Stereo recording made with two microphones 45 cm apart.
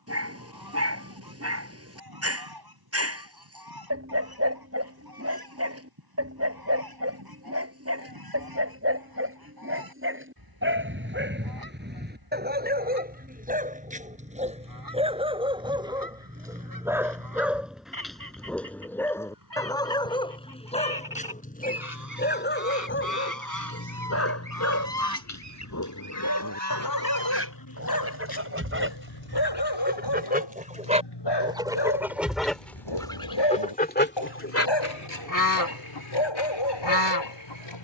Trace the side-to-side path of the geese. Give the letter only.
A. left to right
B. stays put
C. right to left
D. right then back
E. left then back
C.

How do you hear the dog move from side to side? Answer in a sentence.
You can hear the dog go from the right side to the left.